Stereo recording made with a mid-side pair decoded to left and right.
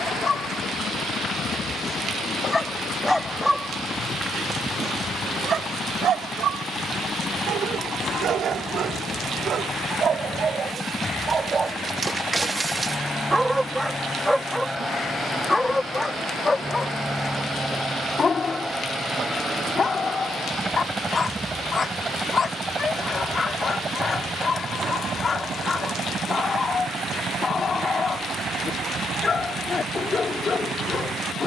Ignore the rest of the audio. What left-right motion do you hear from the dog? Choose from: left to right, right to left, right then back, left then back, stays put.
right then back.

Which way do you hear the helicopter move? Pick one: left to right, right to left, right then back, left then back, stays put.
left to right.